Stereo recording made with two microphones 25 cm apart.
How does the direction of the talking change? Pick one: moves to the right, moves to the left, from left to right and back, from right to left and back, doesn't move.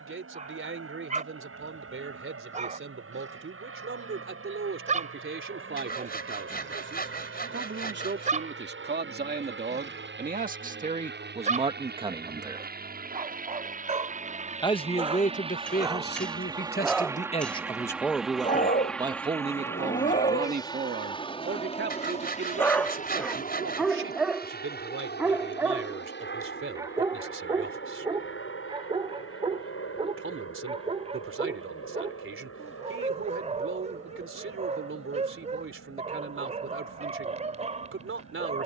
from right to left and back.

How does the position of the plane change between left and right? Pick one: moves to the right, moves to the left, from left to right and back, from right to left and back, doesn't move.
moves to the left.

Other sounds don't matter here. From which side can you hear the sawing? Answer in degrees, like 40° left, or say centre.
40° left.